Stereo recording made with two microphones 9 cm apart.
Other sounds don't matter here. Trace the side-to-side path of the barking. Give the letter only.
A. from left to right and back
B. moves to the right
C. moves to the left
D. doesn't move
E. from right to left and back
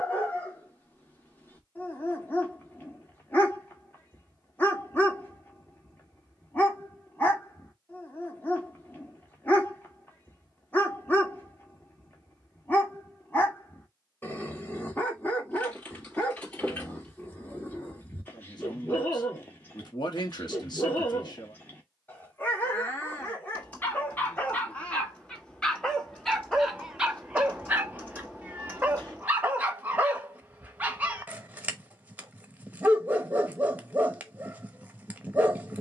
B.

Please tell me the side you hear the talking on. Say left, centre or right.
left.